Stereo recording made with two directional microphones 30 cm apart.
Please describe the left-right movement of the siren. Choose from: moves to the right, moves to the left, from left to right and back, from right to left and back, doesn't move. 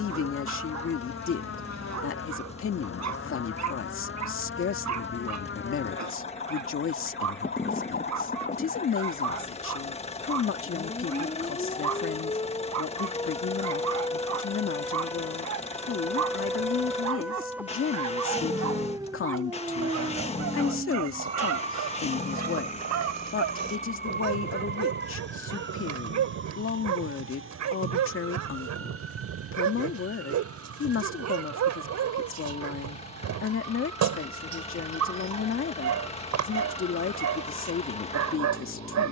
moves to the right.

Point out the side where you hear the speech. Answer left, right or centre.
left.